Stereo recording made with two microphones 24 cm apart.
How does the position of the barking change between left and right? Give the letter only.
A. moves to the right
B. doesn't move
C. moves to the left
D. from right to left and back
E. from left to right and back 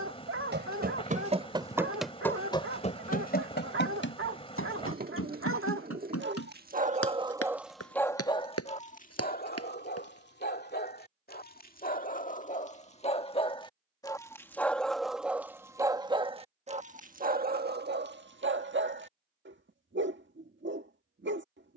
D.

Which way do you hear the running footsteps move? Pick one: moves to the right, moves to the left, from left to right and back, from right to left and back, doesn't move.
moves to the left.